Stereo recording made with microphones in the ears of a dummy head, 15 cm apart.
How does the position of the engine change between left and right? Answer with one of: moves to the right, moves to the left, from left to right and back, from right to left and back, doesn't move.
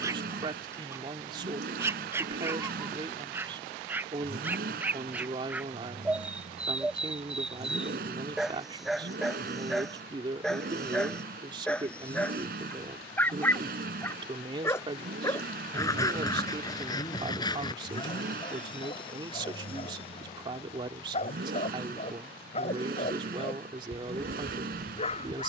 doesn't move.